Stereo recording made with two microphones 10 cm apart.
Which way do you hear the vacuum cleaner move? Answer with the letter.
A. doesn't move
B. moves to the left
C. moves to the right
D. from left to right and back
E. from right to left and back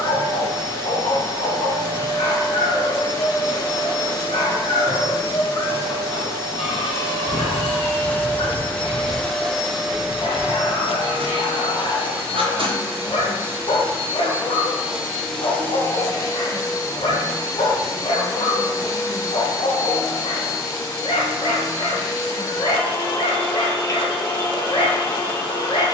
D.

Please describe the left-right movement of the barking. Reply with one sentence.
You can hear the barking stay in one place.